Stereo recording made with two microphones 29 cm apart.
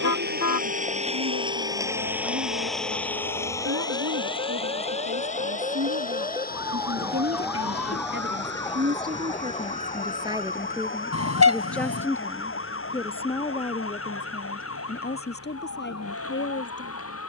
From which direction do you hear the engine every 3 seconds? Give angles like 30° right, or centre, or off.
20° right, 20° left, 30° left, 40° left, 50° left, 50° left.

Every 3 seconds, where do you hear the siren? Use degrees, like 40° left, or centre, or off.
50° right, 30° right, centre, 30° left, 50° left, 60° left.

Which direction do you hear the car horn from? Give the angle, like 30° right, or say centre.
60° left.